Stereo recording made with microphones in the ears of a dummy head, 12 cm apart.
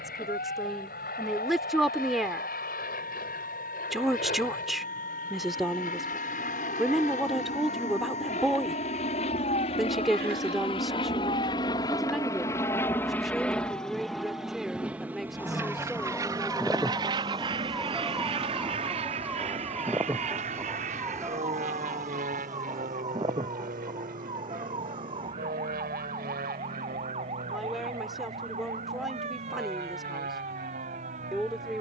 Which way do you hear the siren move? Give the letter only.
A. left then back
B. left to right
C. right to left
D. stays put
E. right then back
B.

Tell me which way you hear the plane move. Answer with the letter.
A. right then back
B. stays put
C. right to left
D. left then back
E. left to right
E.